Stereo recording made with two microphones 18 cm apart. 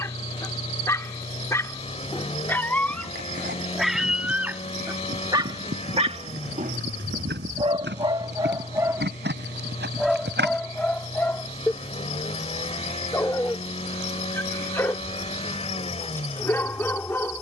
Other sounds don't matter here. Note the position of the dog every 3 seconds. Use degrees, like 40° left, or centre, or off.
10° left, 10° right, 30° right, centre, 10° left, 10° left.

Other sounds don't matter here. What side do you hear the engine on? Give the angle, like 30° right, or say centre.
40° left.